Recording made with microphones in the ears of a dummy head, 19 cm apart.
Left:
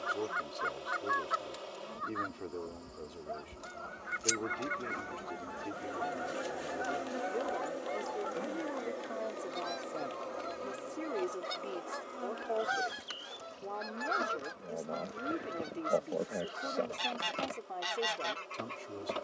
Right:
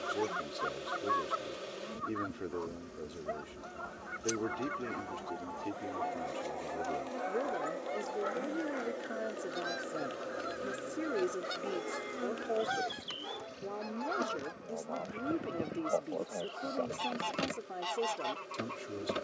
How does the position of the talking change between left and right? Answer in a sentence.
In this clip you hear the talking stay in one place.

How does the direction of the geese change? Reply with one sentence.
In this clip you hear the geese move from left to right and back again.